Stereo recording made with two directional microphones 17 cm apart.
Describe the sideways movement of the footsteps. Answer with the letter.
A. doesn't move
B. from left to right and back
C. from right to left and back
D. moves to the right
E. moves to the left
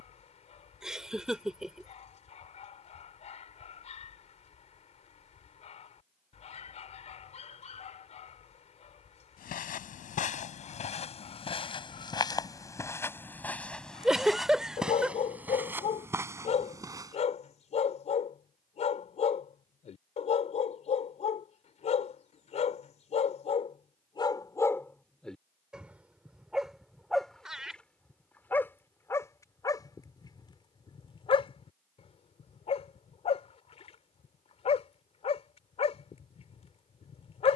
D.